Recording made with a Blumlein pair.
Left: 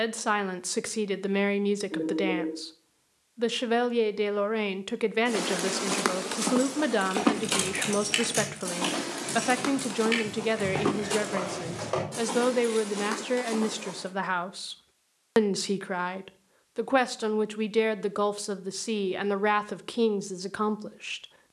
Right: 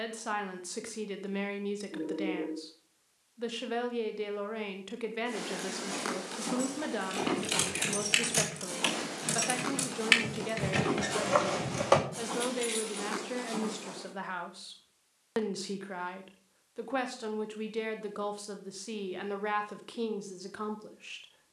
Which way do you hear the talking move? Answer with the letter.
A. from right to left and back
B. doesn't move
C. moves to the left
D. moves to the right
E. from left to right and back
B.